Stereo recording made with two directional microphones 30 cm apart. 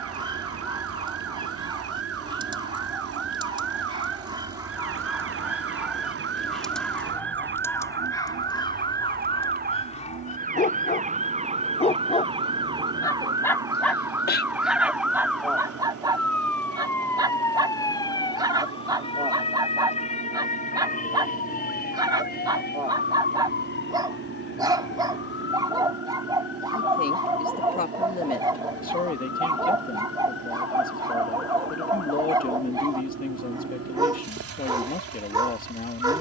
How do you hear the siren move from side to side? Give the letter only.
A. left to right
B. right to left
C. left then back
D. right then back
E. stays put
B.